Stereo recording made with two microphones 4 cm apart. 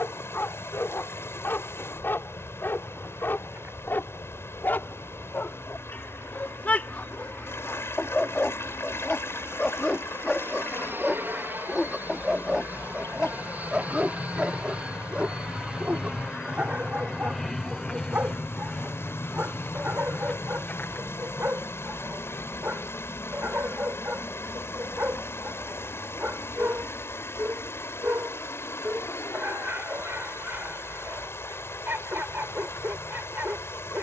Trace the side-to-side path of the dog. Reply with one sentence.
In this clip you hear the dog move from left to right.